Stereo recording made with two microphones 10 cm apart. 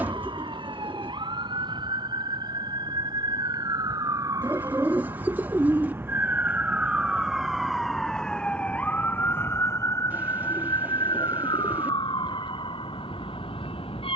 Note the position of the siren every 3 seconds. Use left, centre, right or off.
right, right, centre, left, left.